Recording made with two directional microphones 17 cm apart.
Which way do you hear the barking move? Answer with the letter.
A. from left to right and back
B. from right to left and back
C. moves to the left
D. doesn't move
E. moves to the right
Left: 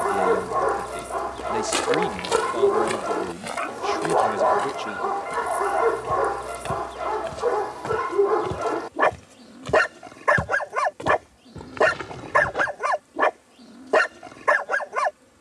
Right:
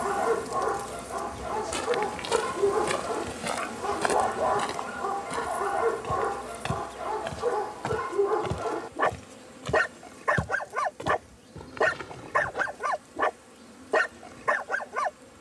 D.